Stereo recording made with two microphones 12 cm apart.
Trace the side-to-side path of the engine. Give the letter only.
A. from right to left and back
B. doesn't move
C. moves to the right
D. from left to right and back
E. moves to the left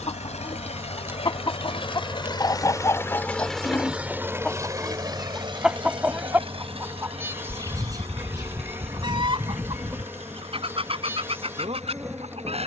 C.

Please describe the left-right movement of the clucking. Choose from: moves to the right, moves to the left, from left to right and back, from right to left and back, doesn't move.
moves to the right.